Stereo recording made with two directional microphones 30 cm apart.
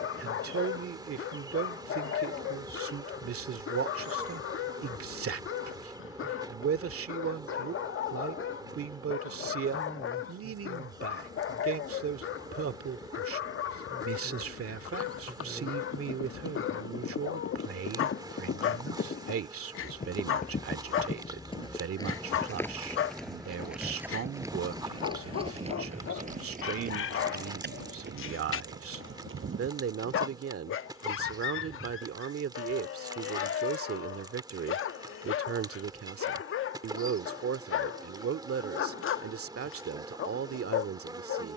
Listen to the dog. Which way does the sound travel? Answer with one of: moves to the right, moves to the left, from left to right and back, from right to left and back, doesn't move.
doesn't move.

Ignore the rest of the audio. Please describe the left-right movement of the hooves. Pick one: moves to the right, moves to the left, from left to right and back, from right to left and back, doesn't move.
moves to the right.